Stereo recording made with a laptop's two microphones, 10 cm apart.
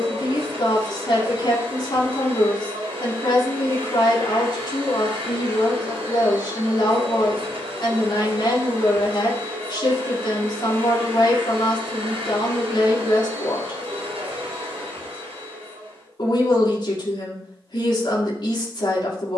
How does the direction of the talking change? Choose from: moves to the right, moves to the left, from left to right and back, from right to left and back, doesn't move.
doesn't move.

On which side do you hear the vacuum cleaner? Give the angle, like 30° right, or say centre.
80° right.